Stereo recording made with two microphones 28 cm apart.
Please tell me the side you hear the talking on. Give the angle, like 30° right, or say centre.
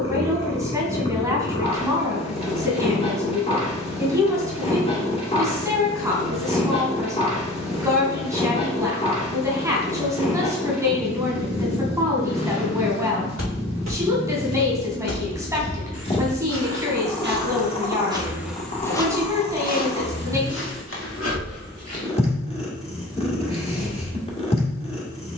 10° right.